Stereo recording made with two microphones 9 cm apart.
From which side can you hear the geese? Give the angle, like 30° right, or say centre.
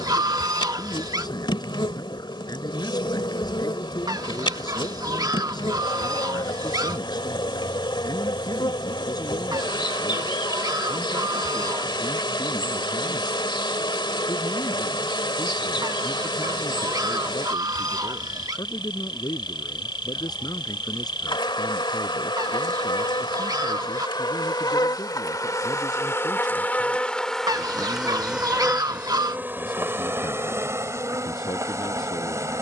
50° right.